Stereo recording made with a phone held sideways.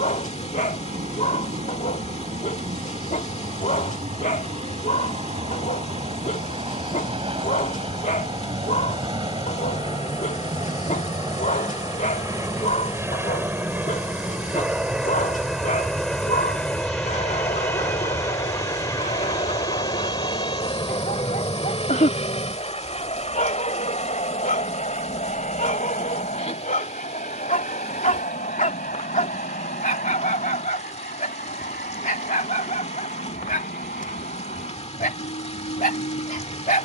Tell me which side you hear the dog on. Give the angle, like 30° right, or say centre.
60° left.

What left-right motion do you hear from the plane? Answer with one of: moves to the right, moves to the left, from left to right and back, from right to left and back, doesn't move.
moves to the left.